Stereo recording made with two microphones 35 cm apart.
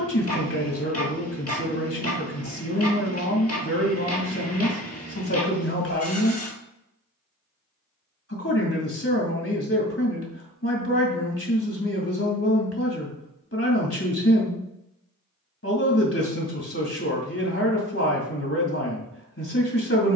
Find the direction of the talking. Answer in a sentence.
In this clip you hear the talking on the left.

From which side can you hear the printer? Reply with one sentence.
In this clip you hear the printer on the left.